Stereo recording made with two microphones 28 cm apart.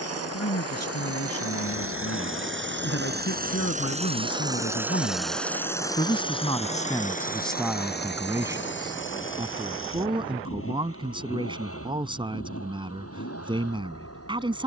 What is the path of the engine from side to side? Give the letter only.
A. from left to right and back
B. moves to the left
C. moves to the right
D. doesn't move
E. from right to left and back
B.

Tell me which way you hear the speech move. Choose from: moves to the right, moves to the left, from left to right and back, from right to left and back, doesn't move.
moves to the right.